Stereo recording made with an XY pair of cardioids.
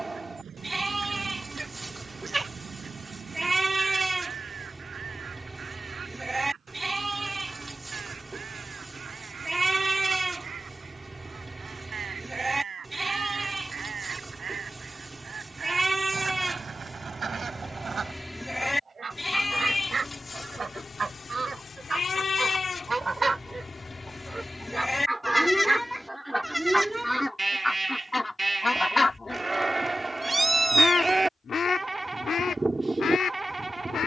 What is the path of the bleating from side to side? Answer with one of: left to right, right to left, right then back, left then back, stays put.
left then back.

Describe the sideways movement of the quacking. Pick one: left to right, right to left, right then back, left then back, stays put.
right to left.